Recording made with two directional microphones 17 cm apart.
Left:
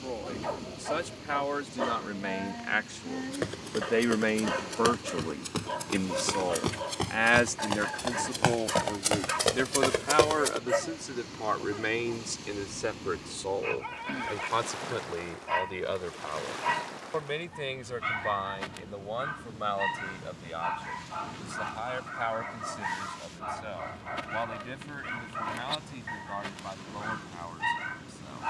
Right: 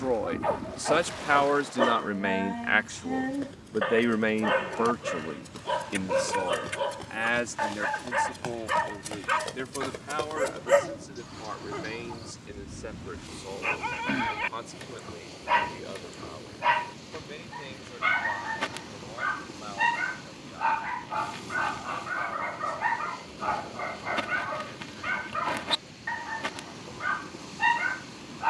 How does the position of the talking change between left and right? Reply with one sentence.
In this clip you hear the talking move from right to left.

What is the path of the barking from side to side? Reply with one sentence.
In this clip you hear the barking stay put.